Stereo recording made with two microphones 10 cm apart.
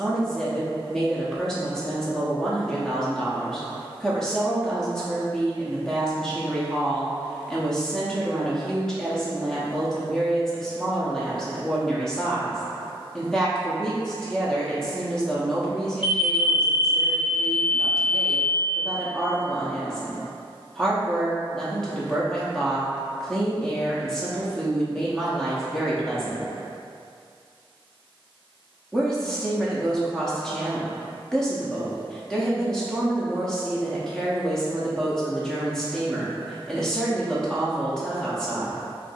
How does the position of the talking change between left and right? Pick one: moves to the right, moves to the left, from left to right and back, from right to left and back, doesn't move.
doesn't move.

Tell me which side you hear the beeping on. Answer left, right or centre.
left.